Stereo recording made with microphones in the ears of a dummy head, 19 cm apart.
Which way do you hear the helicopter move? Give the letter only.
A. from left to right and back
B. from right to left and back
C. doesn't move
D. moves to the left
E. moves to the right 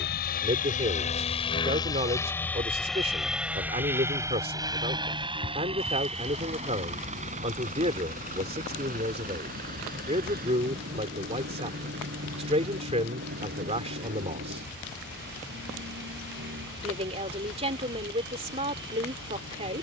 E.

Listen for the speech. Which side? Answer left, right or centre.
right.